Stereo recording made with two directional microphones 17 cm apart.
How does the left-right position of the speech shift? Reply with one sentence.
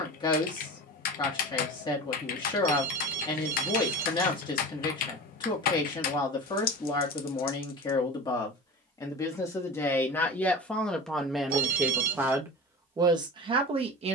In this clip you hear the speech travel towards the right.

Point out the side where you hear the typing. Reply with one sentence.
In this clip you hear the typing on the left.